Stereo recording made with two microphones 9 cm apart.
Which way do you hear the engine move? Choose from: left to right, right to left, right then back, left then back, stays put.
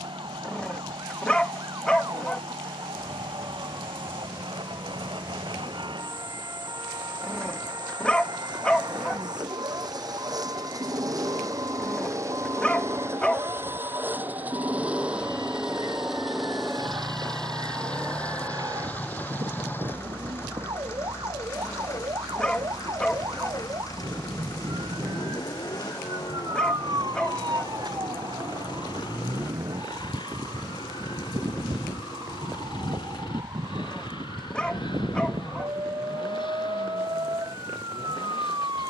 right to left.